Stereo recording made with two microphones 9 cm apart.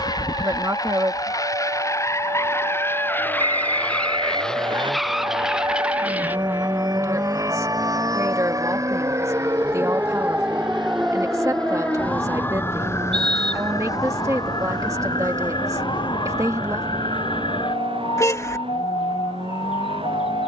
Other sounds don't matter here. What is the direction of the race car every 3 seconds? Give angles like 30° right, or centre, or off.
40° left, 10° left, 30° right, 50° right, 60° right, 70° right, 70° right.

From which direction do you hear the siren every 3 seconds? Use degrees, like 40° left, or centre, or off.
70° right, 60° right, 50° right, 10° right, 30° left, 60° left, 70° left.